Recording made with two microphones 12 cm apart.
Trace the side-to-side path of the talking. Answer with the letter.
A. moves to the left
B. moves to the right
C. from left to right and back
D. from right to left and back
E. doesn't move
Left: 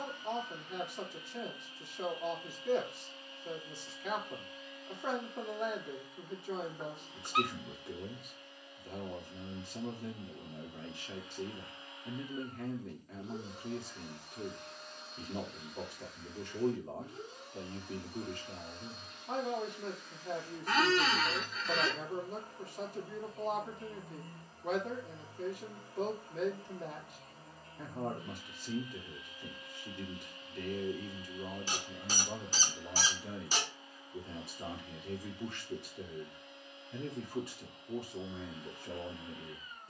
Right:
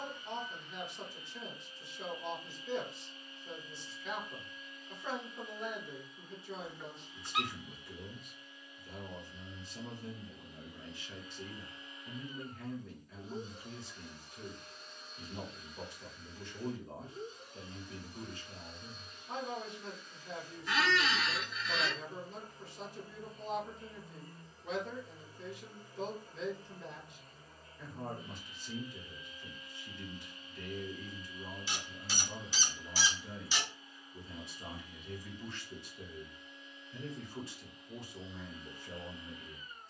E.